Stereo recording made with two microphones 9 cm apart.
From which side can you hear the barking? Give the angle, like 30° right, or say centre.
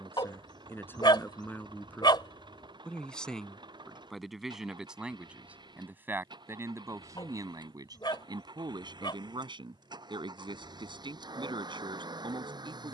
60° left.